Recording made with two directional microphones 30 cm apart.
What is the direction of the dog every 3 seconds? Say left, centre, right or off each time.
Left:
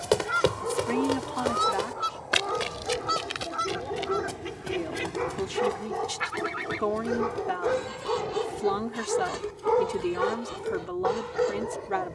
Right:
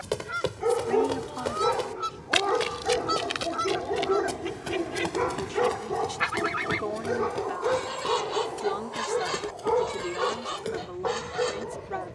right, right, centre, centre.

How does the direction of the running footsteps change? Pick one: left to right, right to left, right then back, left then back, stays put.
left to right.